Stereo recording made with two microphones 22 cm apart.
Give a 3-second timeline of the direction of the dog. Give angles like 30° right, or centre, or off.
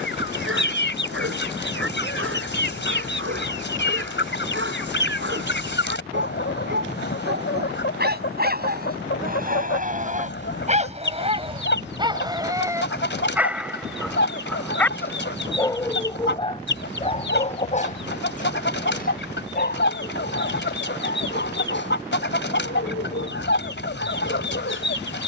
70° right, 60° right, 50° right, 30° right, 10° right, 20° left, 40° left, 50° left, 60° left.